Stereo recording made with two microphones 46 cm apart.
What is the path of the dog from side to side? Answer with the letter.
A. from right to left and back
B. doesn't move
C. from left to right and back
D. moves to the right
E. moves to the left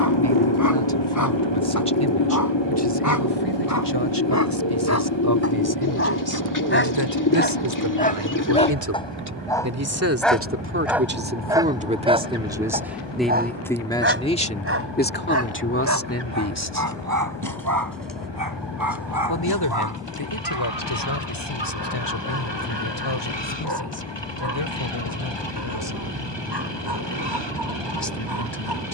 D.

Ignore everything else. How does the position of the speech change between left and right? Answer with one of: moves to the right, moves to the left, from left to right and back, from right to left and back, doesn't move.
moves to the left.